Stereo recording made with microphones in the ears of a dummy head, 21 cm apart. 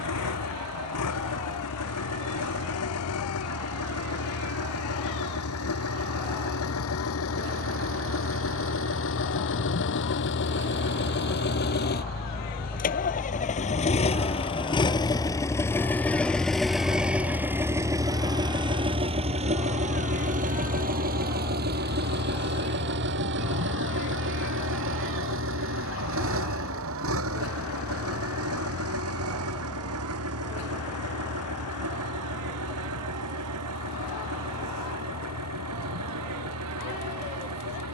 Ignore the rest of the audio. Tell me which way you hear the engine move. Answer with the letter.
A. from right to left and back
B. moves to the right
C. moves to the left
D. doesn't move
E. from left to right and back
B.